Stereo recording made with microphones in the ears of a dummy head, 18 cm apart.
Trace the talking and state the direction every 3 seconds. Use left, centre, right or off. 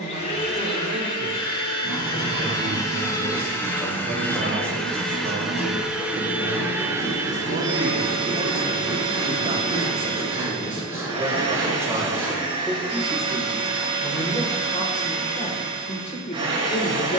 right, right, right, right, centre, left.